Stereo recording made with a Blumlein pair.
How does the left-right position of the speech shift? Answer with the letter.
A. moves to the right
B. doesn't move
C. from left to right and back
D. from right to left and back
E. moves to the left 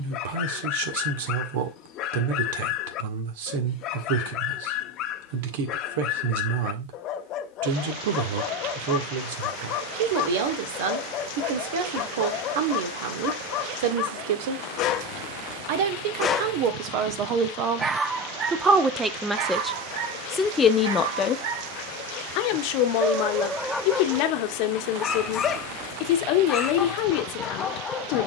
E.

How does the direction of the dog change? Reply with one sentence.
You can hear the dog move from left to right and back again.